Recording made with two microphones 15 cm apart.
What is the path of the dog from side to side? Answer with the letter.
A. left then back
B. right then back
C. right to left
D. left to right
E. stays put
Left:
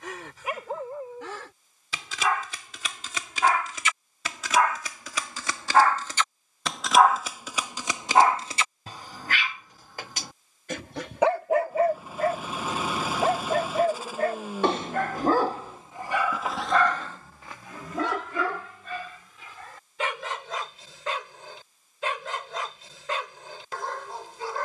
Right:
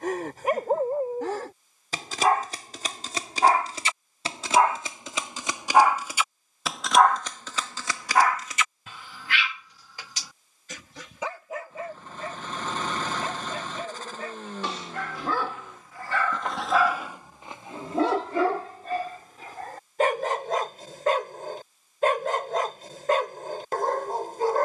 A.